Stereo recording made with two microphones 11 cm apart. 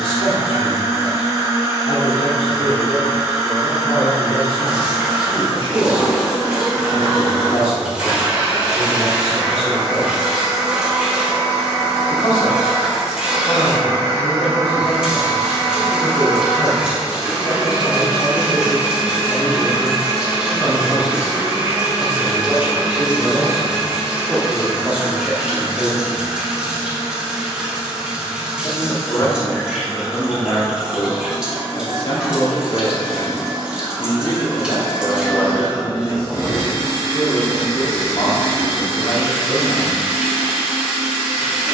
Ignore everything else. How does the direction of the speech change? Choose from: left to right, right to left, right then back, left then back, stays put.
right then back.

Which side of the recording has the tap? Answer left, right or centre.
centre.